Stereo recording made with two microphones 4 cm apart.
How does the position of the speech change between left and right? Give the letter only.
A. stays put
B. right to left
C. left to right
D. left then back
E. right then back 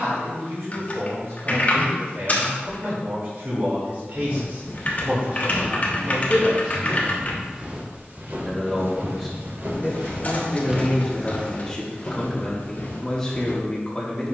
B.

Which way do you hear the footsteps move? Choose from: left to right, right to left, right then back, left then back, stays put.
right then back.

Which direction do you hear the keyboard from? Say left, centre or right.
left.